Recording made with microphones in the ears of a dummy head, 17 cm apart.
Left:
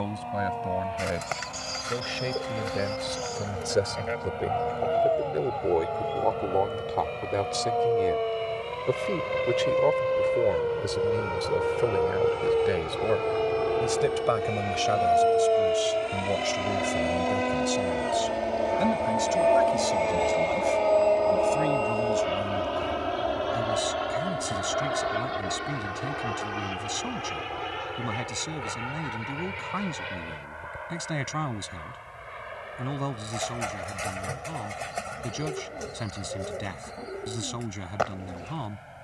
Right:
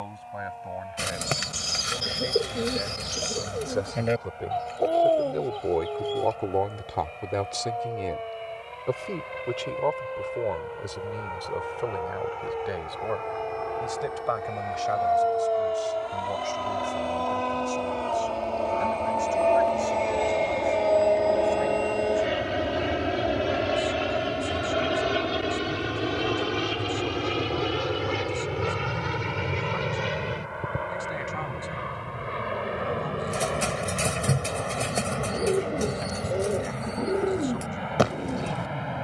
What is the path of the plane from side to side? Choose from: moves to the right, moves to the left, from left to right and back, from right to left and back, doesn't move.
moves to the right.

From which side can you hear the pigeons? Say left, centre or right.
right.